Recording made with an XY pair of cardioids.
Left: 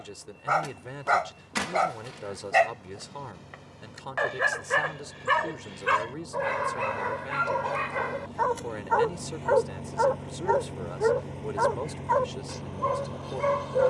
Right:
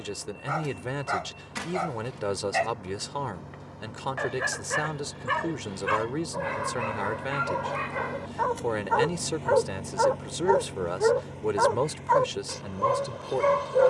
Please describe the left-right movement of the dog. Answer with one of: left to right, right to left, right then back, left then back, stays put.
left to right.